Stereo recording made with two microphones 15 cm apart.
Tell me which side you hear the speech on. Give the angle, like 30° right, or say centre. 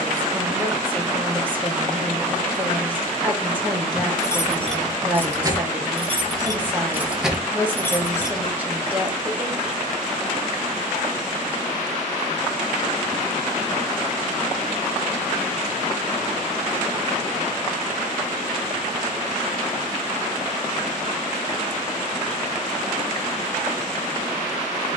10° right.